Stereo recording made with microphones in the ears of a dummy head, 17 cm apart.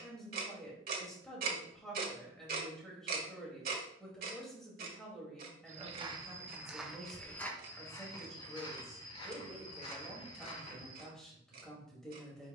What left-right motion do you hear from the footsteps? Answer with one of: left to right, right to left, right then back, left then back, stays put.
right to left.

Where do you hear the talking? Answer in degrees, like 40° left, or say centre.
centre.